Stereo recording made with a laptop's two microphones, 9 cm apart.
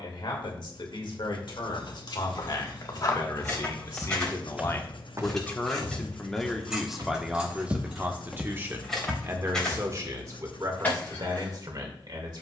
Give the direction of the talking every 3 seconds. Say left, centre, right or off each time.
left, left, centre, right.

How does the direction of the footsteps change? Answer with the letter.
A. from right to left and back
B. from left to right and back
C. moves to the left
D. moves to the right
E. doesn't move
B.